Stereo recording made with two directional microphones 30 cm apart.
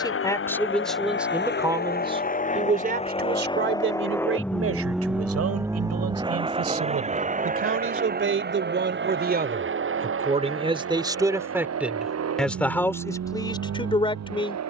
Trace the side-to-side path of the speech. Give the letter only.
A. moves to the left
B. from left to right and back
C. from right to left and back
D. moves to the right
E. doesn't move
B.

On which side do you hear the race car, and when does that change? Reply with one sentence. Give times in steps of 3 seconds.
In this clip you hear the race car on the left from 0 s, in the centre from 3 s and on the right from 6 s.